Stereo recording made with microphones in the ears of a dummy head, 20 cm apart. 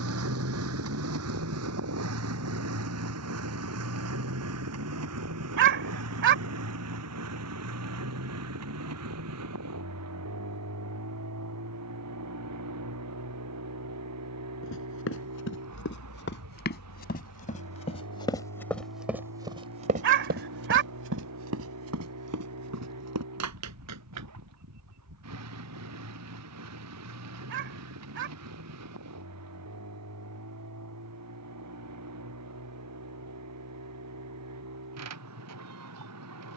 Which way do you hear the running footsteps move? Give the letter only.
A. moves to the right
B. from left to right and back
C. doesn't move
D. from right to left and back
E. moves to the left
A.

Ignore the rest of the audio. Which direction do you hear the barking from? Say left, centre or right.
right.